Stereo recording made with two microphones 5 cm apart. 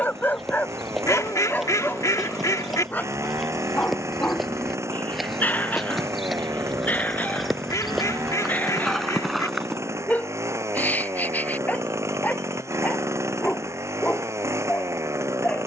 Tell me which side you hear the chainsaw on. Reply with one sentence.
You can hear the chainsaw on the right.